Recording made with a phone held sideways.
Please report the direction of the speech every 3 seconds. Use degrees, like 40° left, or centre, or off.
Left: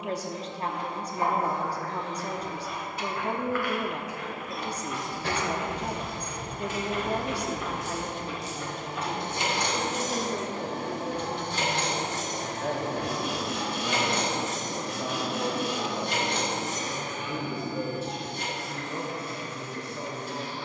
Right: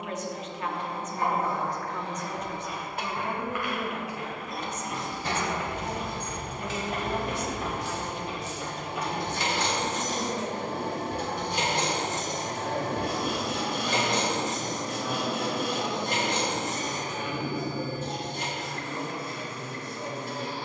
30° left, 30° left, 40° left, 60° left, 70° left, 80° left, 80° left.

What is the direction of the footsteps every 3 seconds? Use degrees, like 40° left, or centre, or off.
10° left, 40° right, 40° right, 10° left, off, off, off.